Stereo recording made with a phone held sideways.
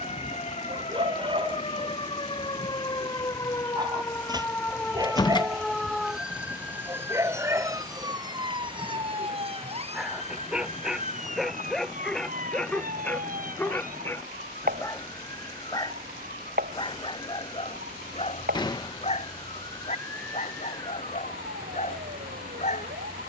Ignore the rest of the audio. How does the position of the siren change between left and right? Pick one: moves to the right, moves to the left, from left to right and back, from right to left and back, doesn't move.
moves to the right.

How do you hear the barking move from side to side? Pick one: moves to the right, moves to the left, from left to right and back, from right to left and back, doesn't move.
moves to the left.